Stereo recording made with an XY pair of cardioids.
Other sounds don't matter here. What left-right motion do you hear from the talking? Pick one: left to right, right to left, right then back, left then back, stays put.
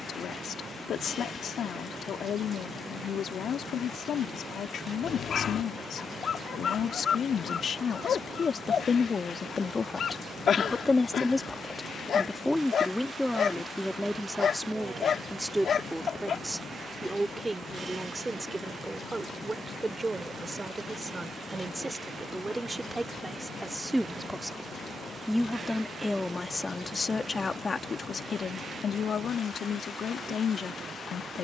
right then back.